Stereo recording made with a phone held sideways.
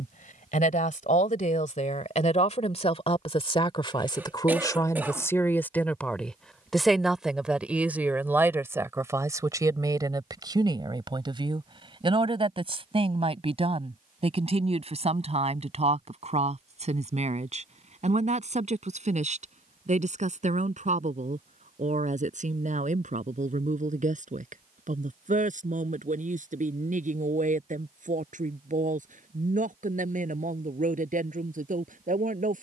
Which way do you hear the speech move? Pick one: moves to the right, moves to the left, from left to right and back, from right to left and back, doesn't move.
moves to the right.